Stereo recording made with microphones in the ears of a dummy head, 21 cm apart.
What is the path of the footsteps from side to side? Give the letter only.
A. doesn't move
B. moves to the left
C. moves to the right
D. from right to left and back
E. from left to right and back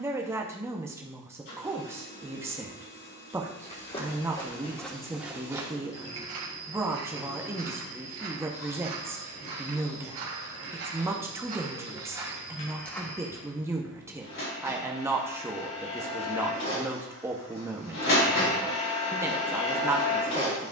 E.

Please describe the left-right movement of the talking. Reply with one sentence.
You can hear the talking stay put.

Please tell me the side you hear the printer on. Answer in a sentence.
In this clip you hear the printer on the left.